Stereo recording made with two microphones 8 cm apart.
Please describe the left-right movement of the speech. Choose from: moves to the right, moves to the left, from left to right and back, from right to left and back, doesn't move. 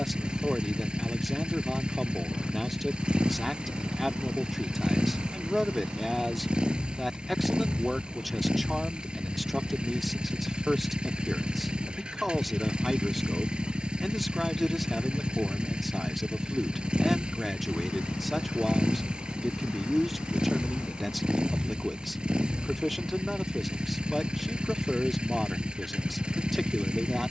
doesn't move.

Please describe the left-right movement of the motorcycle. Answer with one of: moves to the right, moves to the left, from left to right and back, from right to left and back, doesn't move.
doesn't move.